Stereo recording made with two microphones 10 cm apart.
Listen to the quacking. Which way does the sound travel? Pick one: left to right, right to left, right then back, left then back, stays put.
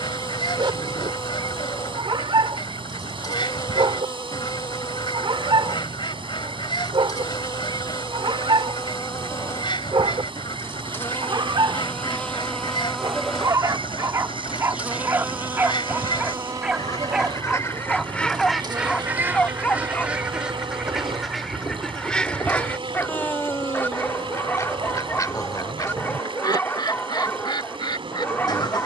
right then back.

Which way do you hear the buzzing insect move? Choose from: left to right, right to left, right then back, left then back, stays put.
left to right.